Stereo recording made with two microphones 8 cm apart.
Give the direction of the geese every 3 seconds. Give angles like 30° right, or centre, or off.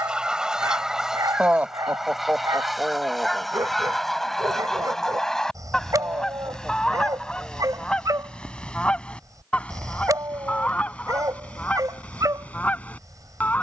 10° right, centre, 10° left, 20° left, 20° left.